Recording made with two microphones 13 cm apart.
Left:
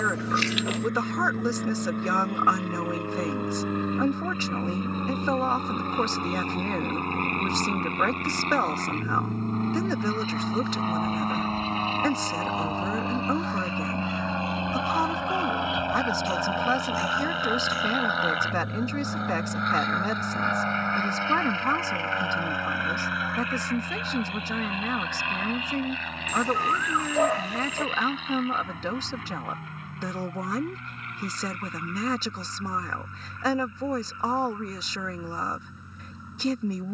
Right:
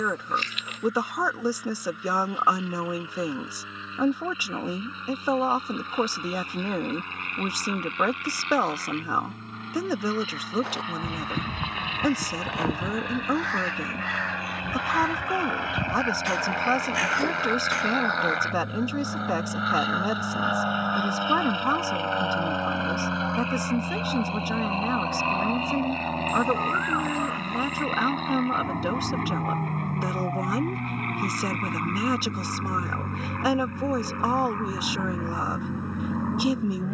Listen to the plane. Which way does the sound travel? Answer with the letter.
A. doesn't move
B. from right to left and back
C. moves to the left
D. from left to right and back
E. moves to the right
E.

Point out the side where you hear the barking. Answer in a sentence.
In this clip you hear the barking on the left.